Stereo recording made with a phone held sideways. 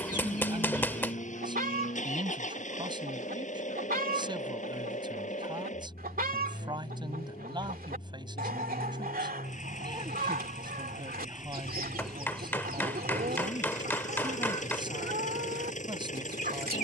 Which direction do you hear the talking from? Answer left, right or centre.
right.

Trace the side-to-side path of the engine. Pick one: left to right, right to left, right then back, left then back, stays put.
stays put.